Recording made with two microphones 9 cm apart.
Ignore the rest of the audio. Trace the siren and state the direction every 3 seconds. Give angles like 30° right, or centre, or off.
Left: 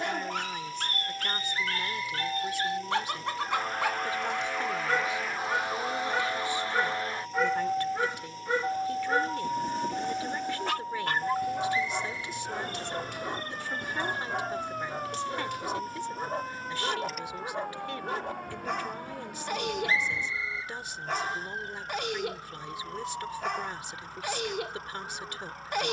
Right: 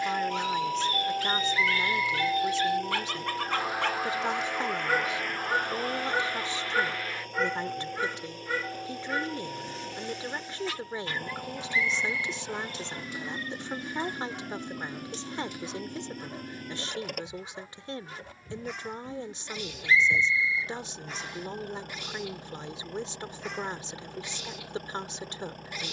30° right, centre, 20° left, 40° left, 50° left, 60° left, 60° left, 70° left, 70° left.